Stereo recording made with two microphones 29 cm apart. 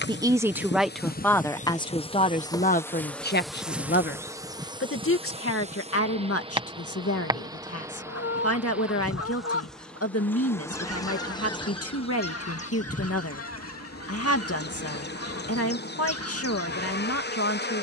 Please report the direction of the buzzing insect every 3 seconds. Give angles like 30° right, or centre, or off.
30° left, 10° right, 10° right, 10° left, 30° left, 40° left.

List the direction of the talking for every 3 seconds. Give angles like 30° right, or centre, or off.
10° left, 40° left, 50° left, 50° left, 50° left, 50° left.